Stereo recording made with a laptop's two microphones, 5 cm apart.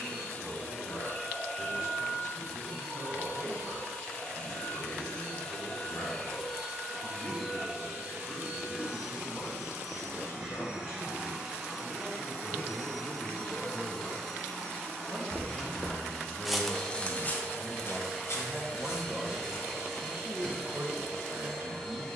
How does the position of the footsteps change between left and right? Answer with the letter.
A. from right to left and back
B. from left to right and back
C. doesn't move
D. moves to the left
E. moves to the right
D.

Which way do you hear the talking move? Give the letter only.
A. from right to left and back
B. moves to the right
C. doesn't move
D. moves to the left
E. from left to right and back
B.